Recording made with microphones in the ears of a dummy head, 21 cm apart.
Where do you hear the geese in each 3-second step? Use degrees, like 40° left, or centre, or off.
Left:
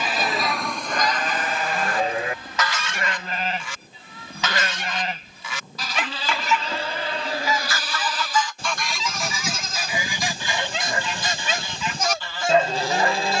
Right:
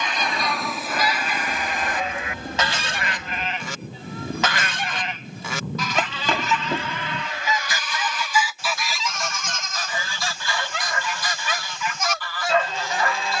10° right, 40° right, 20° right, 20° left, 20° left.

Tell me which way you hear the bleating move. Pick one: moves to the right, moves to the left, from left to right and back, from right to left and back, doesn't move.
doesn't move.